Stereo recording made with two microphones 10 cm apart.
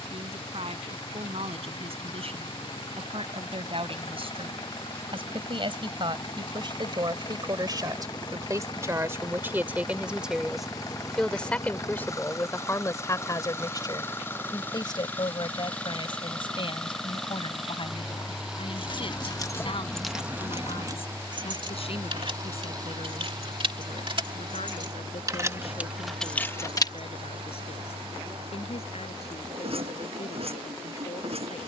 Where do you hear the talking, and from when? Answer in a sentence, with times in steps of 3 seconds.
You can hear the talking on the right from 0 s, in the centre from 9 s and on the left from 12 s.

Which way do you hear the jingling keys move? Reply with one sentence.
You can hear the jingling keys go right and come back.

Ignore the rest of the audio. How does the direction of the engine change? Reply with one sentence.
In this clip you hear the engine travel towards the right.